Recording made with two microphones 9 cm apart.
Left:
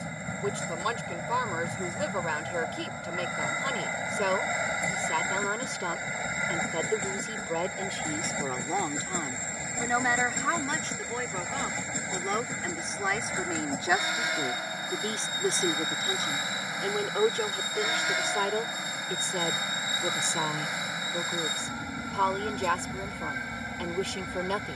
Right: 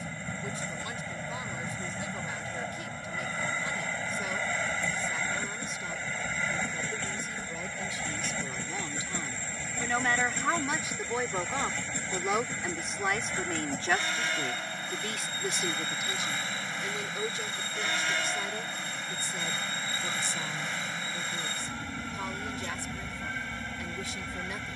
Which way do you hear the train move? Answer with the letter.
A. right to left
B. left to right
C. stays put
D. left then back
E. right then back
C.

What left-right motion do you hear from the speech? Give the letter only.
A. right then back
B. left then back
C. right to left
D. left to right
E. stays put
A.